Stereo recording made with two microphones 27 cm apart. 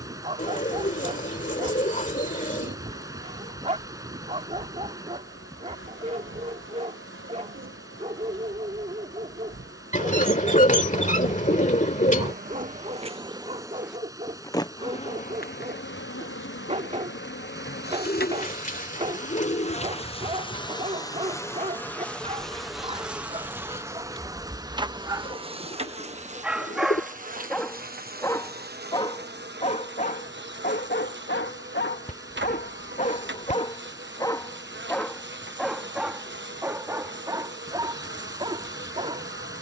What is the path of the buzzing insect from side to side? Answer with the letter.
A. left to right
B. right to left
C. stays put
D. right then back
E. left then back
E.